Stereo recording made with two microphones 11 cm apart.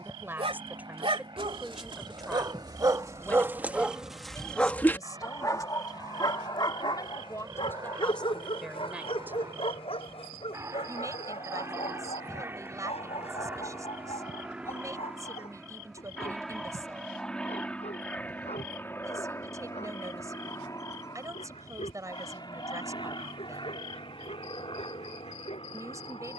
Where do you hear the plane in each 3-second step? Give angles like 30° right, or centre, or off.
50° right, 50° right, 40° right, 30° right, 20° right, centre, 20° left, 40° left, 50° left.